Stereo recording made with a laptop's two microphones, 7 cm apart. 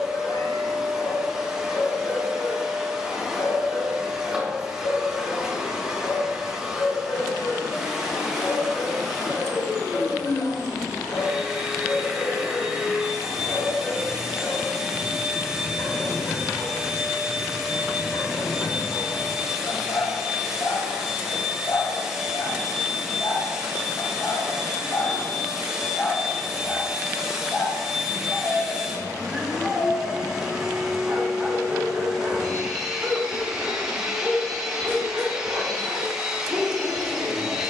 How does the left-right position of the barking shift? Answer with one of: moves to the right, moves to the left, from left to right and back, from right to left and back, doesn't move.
moves to the right.